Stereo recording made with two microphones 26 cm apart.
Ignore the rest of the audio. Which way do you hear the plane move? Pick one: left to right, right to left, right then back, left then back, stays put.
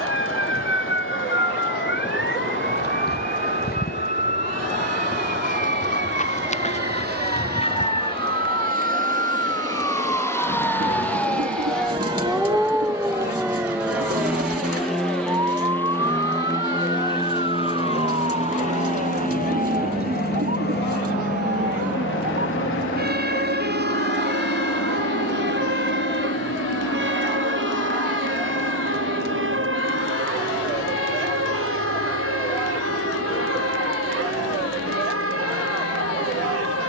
right to left.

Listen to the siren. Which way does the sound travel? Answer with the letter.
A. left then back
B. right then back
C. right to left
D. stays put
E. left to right
E.